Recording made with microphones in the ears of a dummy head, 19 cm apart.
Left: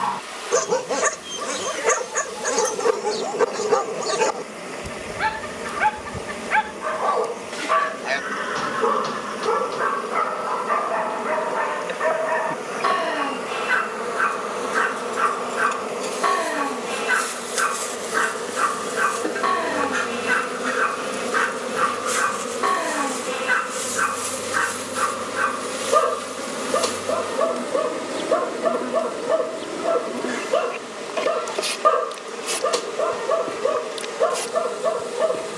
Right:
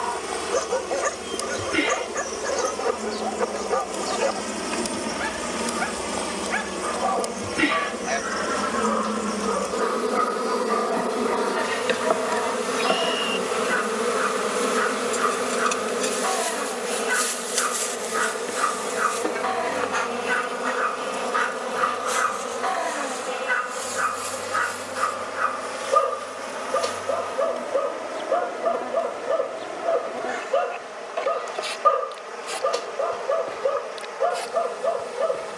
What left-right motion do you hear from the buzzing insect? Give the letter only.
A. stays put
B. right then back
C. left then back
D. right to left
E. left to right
D.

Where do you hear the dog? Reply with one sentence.
In this clip you hear the dog on the left.